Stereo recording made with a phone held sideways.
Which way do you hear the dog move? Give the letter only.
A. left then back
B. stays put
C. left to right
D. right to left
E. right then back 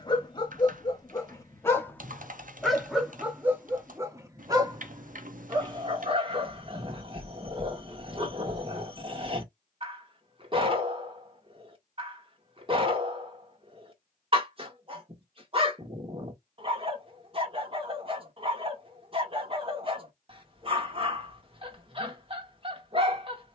C.